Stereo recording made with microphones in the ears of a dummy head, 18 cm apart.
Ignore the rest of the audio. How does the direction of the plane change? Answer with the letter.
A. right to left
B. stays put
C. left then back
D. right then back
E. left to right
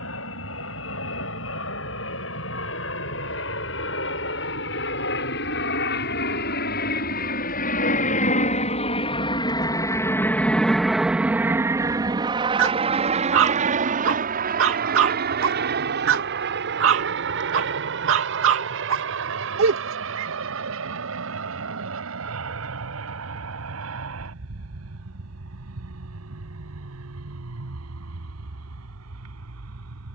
E.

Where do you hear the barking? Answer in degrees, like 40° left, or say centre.
70° right.